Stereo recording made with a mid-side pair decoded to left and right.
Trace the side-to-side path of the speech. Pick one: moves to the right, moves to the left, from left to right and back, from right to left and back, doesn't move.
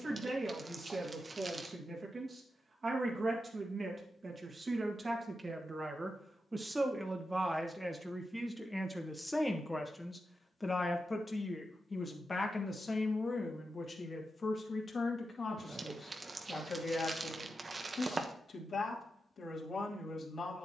moves to the left.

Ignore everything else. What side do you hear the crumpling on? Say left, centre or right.
right.